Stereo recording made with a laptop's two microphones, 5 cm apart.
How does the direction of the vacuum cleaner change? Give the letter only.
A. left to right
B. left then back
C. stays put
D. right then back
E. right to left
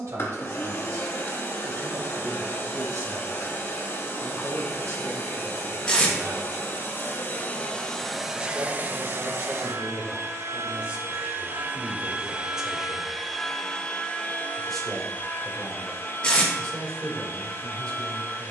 D.